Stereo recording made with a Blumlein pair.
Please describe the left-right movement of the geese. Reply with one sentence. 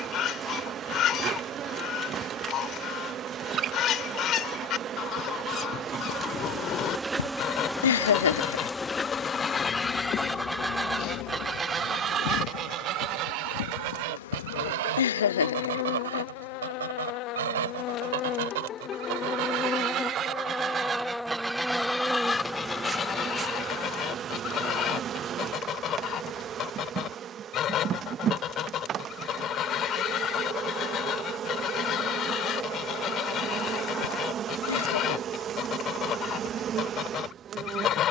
You can hear the geese go right and come back.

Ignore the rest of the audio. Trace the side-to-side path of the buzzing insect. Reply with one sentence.
In this clip you hear the buzzing insect move from right to left and back again.